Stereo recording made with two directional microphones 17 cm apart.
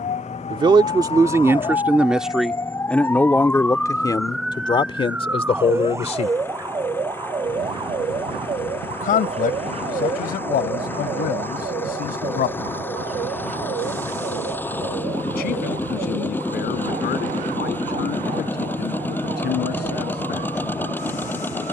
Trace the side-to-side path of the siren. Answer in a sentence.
In this clip you hear the siren move to the right.